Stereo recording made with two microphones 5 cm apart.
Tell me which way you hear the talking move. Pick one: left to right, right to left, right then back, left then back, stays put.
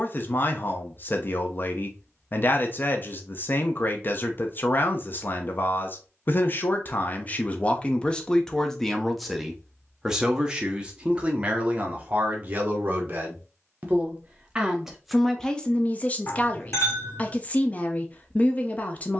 right then back.